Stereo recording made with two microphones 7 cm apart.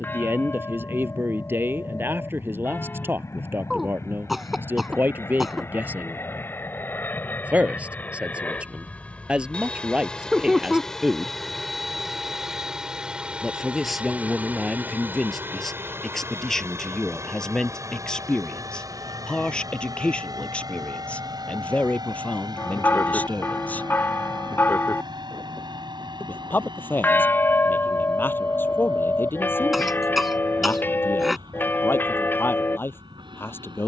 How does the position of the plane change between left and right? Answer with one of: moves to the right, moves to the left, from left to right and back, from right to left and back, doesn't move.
moves to the right.